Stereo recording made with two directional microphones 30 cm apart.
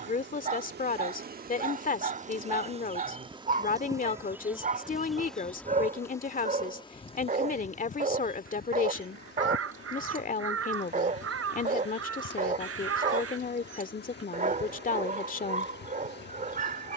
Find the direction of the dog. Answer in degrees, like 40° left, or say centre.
30° right.